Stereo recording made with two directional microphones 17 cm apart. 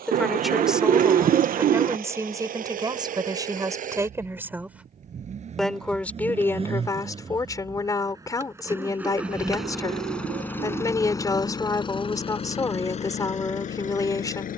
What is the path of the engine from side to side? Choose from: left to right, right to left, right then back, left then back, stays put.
right to left.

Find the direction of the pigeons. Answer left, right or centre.
right.